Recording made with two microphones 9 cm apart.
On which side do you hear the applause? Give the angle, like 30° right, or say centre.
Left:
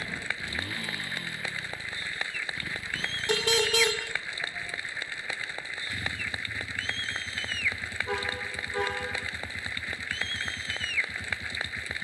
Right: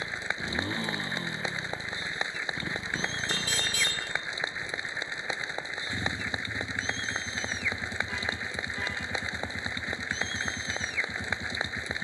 20° right.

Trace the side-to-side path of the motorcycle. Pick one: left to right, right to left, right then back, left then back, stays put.
stays put.